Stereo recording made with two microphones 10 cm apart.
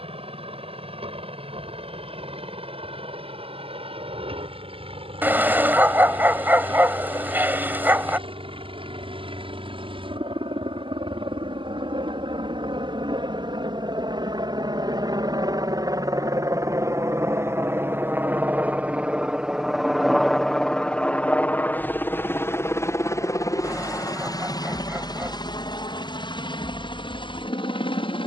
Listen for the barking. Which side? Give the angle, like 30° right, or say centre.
20° right.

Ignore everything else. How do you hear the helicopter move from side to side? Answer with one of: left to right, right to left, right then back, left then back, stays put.
right to left.